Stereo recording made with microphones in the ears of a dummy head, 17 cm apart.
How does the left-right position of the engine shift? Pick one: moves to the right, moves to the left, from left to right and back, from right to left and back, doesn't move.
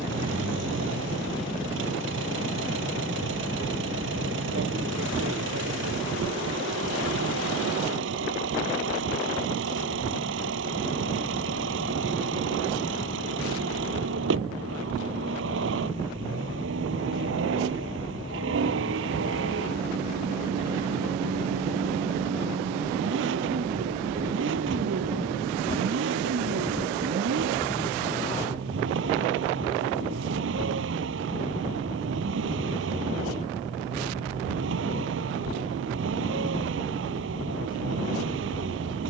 doesn't move.